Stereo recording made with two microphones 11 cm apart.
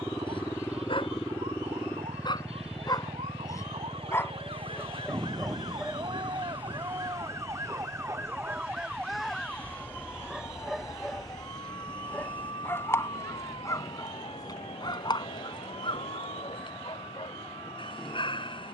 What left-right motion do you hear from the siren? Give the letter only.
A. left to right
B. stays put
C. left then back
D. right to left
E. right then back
D.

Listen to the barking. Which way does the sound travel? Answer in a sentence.
You can hear the barking move from left to right and back again.